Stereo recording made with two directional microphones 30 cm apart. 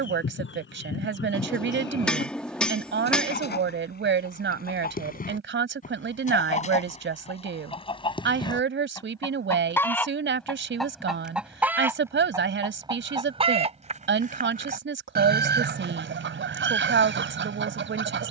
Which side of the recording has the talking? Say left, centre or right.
right.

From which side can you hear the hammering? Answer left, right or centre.
centre.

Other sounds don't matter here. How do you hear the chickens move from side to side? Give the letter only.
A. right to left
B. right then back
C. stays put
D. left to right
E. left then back
D.